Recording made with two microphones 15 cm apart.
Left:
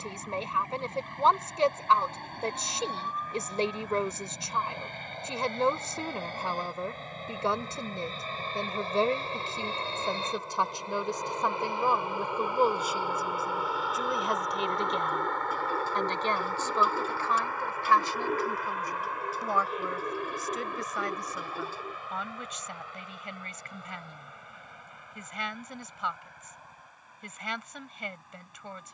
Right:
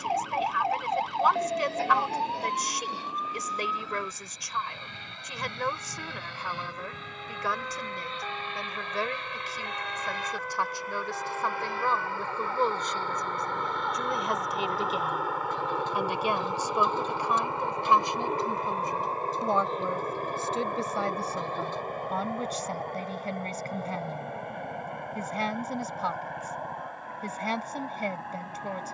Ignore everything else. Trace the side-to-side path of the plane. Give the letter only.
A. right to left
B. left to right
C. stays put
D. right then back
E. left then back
B.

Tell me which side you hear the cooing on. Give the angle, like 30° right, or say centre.
10° left.